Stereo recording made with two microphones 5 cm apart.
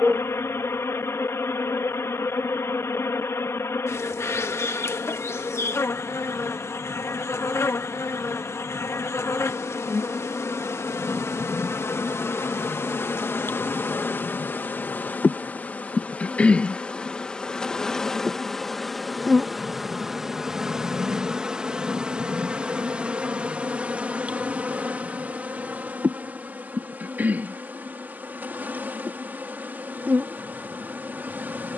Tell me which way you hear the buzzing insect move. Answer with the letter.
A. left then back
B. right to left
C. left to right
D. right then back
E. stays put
C.